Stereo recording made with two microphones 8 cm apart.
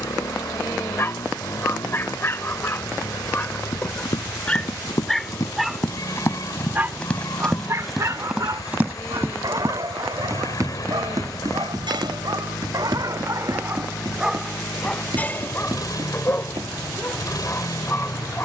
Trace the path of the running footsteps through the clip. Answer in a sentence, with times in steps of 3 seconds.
In this clip you hear the running footsteps not at all from 0 s, on the left from 3 s, in the centre from 6 s and on the right from 9 s.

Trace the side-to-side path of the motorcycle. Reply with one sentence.
In this clip you hear the motorcycle stay put.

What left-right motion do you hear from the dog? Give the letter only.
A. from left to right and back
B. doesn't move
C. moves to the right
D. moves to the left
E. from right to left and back
A.